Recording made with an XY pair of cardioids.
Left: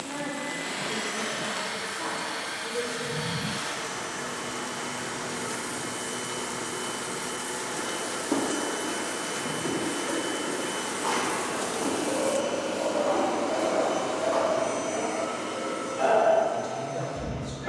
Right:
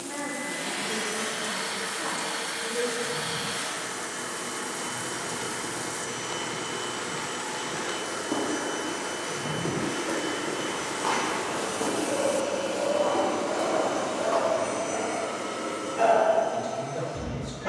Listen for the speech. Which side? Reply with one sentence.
You can hear the speech on the right.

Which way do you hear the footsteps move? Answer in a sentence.
You can hear the footsteps travel towards the right.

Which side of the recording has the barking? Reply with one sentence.
In this clip you hear the barking on the right.